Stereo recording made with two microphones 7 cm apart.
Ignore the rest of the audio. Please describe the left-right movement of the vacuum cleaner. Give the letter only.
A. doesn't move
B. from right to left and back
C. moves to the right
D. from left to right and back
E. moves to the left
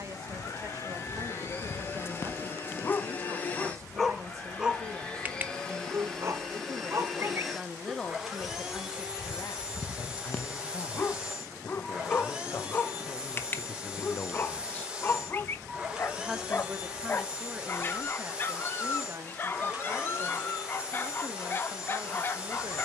C.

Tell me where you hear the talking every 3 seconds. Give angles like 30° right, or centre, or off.
40° right, 40° right, centre, 60° left, 40° left, 10° right, 40° right, 40° right.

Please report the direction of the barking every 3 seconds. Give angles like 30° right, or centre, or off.
30° left, 10° right, 30° right, 20° left, 30° left, 30° left, 30° left, 30° left.